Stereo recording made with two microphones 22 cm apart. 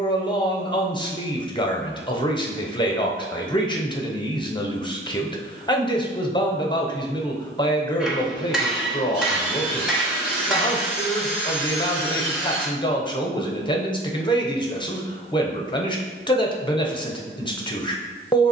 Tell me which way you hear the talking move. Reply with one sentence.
You can hear the talking stay in one place.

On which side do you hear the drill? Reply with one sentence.
You can hear the drill in the centre.